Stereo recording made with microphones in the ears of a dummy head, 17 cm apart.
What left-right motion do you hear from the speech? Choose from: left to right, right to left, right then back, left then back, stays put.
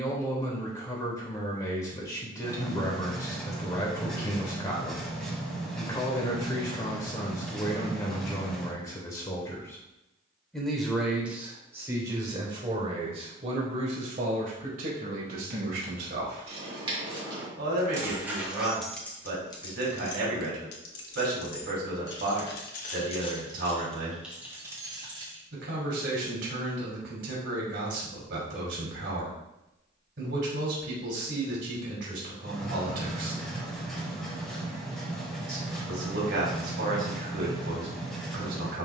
left to right.